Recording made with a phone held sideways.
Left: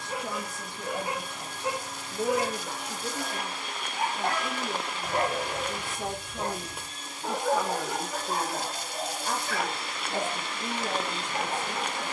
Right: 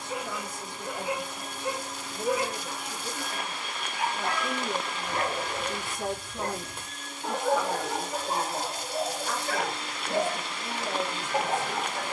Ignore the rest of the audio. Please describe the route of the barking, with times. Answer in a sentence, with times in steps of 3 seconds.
In this clip you hear the barking on the left from 0 s, in the centre from 6 s and on the right from 9 s.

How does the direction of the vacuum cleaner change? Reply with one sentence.
You can hear the vacuum cleaner move from right to left.